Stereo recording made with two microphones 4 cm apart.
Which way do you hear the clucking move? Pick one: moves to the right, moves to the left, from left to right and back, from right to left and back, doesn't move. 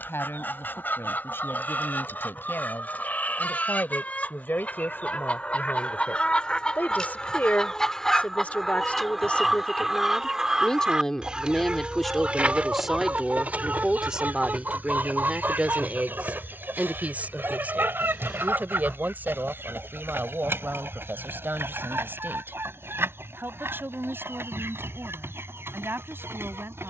moves to the right.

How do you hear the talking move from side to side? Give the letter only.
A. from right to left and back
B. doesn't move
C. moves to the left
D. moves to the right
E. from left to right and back
D.